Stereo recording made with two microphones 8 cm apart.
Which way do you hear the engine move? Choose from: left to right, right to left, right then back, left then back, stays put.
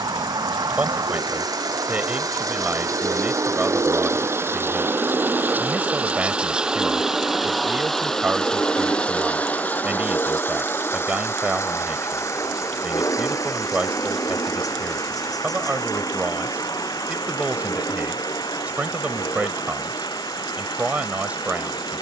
right to left.